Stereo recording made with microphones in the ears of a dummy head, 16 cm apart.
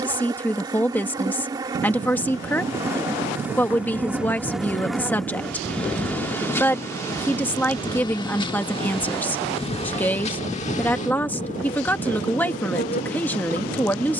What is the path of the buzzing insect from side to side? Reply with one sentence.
You can hear the buzzing insect go from the right side to the left.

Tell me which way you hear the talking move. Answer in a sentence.
In this clip you hear the talking stay in one place.